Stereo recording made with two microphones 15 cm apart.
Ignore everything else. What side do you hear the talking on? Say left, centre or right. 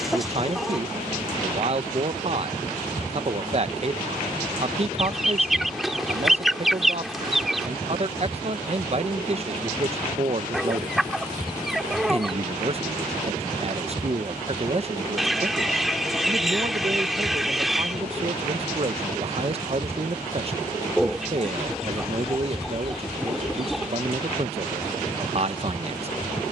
right.